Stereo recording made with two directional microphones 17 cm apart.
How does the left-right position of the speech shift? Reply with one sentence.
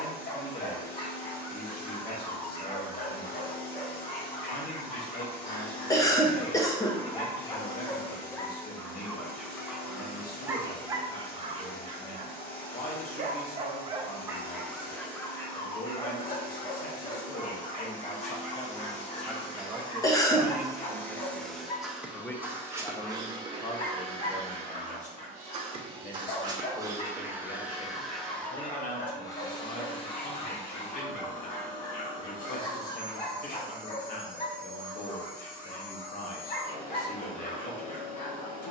In this clip you hear the speech move from left to right and back again.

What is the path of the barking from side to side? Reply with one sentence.
You can hear the barking move from left to right and back again.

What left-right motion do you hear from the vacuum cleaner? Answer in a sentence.
You can hear the vacuum cleaner move from left to right and back again.